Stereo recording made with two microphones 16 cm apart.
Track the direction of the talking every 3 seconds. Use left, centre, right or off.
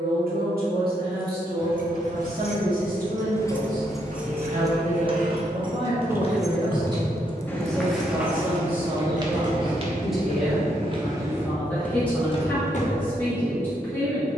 right, right, right, centre, centre.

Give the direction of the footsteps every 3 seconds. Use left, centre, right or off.
off, off, centre, right, left.